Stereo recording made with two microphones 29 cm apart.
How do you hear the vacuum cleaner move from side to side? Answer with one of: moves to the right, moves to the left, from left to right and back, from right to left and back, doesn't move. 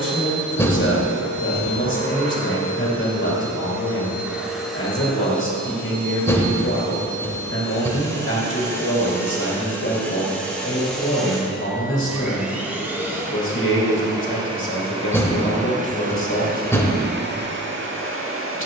from right to left and back.